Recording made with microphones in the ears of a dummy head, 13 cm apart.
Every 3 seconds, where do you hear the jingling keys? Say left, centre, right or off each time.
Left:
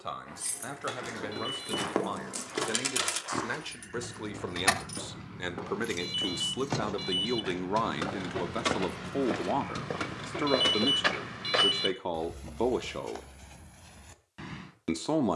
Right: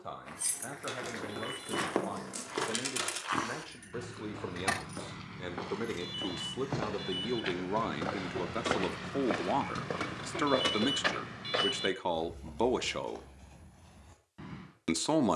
centre, left, left, centre, off.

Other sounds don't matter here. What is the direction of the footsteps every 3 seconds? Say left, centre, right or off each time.
right, right, right, centre, left.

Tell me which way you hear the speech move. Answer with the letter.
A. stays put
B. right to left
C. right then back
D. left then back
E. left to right
E.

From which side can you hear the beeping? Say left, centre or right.
left.